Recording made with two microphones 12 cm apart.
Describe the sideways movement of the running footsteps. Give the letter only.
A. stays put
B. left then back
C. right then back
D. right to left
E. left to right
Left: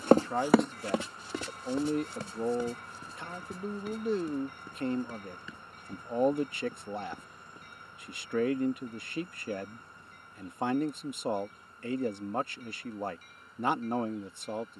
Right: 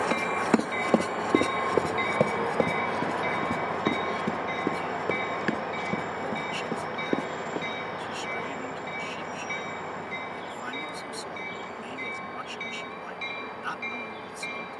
E.